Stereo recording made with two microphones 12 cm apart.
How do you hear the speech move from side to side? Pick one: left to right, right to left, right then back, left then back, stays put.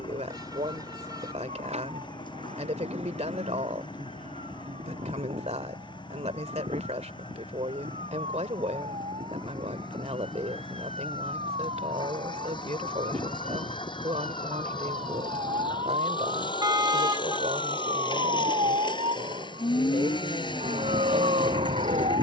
stays put.